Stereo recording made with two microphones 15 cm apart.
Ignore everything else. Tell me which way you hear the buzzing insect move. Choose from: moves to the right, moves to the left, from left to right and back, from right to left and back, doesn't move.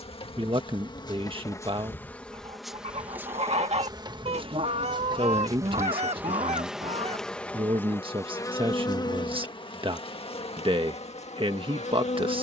from left to right and back.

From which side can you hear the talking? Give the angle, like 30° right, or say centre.
40° right.